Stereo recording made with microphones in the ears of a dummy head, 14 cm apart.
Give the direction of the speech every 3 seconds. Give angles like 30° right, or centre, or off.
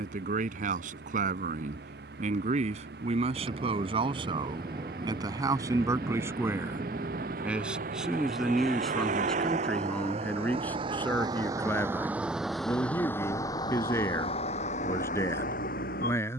50° right, 30° right, 10° right, 10° left, 20° left, 20° left.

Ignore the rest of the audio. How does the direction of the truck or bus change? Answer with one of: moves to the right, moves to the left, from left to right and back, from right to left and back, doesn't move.
moves to the left.